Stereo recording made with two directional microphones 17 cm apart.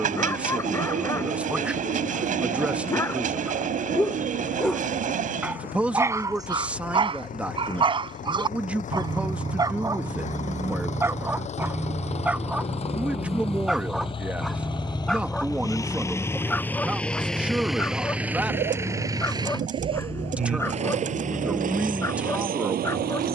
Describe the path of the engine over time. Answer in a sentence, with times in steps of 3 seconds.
You can hear the engine on the left from 0 s, in the centre from 15 s and on the right from 18 s.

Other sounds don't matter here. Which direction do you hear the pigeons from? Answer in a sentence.
You can hear the pigeons on the right.